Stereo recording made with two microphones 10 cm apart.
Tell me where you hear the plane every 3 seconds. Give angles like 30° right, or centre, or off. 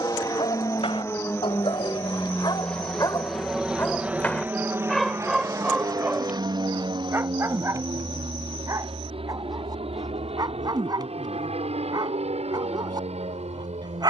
20° left, 20° right, 50° right, 60° right, 70° right.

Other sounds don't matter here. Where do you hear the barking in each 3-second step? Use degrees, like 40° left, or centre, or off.
60° left, 10° left, 30° right, 40° right, 40° right.